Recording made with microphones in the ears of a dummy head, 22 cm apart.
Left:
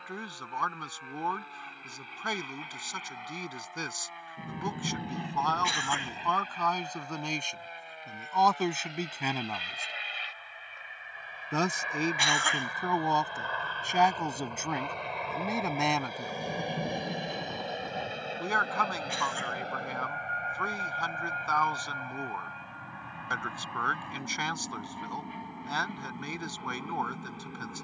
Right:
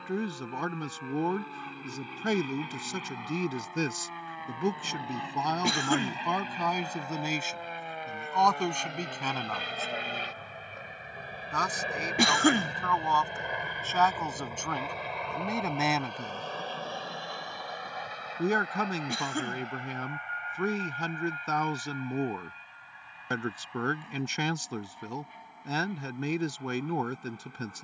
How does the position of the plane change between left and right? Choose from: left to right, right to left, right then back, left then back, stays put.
right to left.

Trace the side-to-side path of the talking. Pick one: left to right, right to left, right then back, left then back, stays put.
left then back.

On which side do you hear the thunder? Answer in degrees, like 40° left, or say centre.
70° left.